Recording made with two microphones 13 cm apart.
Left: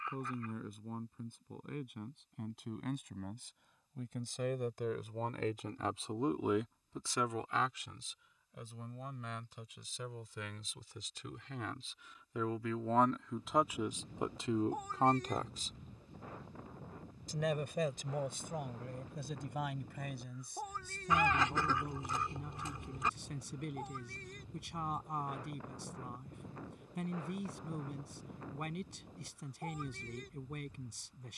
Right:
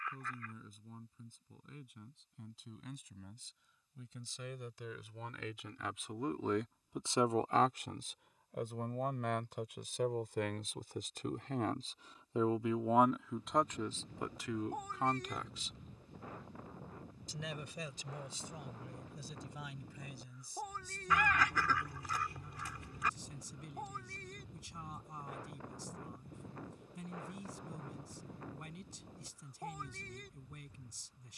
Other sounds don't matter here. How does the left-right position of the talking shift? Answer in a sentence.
You can hear the talking move from left to right and back again.